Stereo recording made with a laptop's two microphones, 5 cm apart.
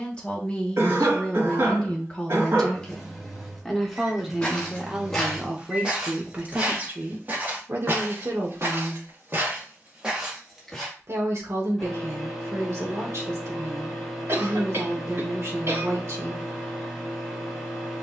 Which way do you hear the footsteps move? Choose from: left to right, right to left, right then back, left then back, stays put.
right then back.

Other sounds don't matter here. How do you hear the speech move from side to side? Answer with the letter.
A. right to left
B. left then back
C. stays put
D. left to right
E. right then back
D.